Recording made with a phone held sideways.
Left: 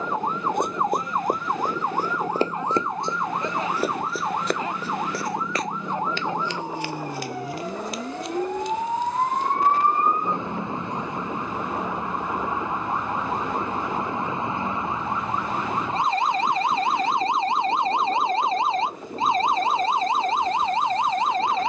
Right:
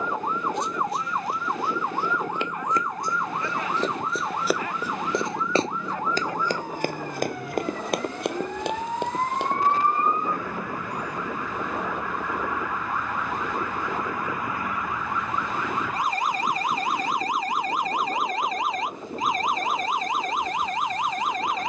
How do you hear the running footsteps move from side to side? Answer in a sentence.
In this clip you hear the running footsteps go from the left side to the right.